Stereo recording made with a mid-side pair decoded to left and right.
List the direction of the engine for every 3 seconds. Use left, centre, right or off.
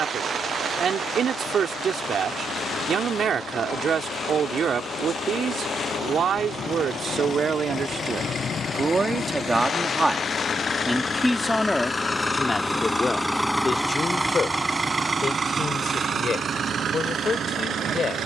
left, left, left, left, centre, right.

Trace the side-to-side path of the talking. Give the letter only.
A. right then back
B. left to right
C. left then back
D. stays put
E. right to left
E.